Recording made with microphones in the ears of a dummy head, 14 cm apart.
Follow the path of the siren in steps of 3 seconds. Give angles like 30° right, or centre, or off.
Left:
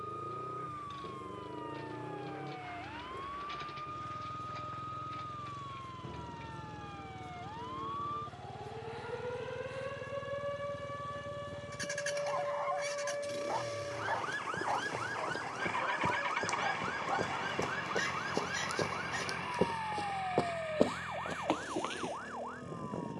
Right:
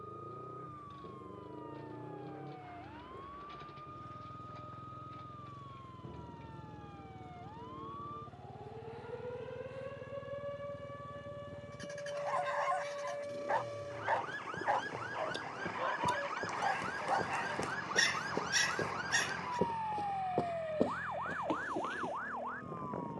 60° left, 50° left, 50° left, 40° left, 20° left, centre, 30° right, 50° right.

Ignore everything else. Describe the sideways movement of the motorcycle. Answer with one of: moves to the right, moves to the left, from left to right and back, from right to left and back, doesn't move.
doesn't move.